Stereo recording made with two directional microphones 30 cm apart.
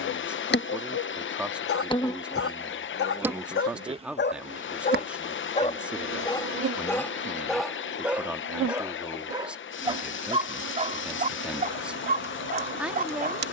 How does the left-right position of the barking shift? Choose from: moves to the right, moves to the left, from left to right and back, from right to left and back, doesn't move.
moves to the right.